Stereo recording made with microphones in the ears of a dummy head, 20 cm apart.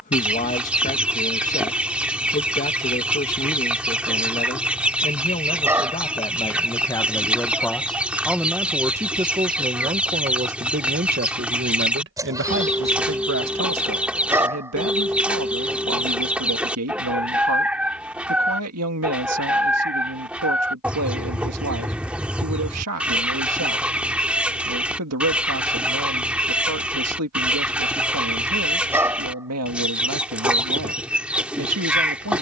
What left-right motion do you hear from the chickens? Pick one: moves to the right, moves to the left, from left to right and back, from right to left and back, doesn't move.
doesn't move.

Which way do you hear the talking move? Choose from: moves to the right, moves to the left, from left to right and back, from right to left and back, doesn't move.
moves to the right.